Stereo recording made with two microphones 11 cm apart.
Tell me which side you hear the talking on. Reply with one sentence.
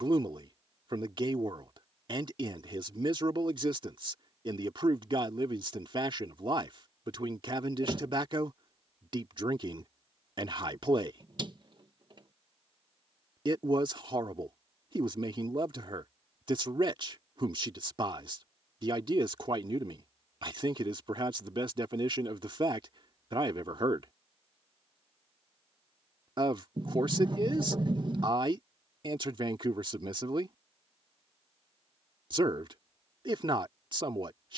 In this clip you hear the talking on the right.